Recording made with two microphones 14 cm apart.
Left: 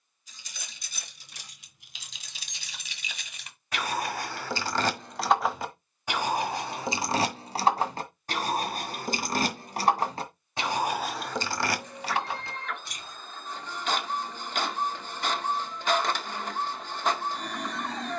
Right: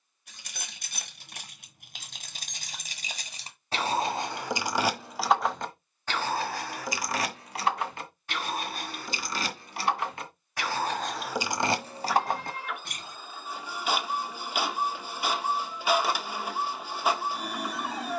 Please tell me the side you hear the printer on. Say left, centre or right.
centre.